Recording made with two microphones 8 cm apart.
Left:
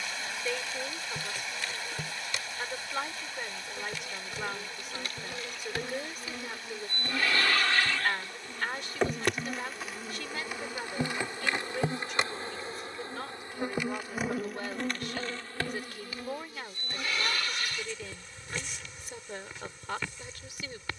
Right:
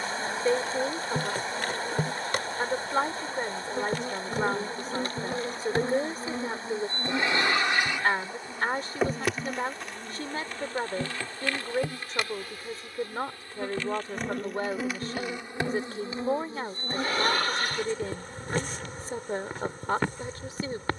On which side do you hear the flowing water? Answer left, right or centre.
right.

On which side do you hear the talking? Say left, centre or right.
right.